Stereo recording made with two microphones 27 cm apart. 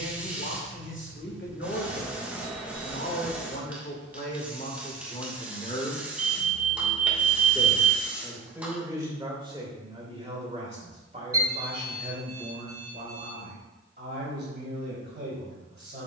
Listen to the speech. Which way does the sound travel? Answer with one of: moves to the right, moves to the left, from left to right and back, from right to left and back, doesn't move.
moves to the right.